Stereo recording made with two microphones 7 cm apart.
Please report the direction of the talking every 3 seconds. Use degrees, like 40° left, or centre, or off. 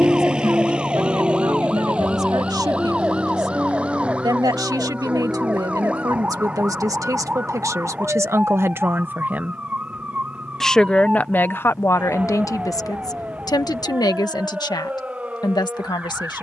70° right, 60° right, 50° right, 10° left, 60° left, 80° left.